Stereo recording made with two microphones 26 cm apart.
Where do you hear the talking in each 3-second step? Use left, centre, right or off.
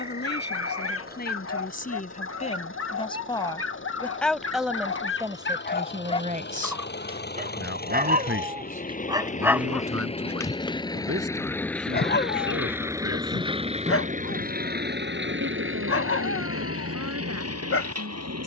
left, centre, right, right, right, right.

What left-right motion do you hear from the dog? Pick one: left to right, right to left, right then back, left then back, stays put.
right then back.